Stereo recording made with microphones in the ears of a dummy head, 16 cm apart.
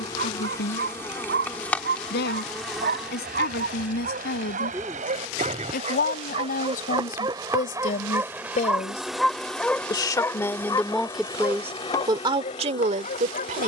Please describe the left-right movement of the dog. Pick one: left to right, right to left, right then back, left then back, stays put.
right to left.